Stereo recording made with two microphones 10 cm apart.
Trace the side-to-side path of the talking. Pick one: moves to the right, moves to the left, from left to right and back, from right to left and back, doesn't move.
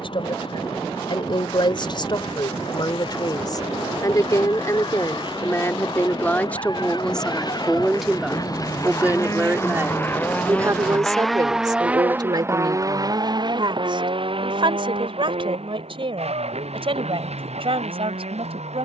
moves to the right.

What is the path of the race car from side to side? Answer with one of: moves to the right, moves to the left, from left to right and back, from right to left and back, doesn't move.
moves to the right.